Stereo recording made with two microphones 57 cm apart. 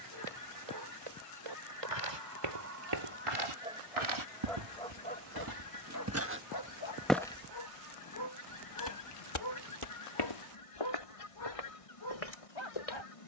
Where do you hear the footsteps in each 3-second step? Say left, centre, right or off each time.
right, right, centre, left, left.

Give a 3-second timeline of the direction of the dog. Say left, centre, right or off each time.
right, centre, left, left, left.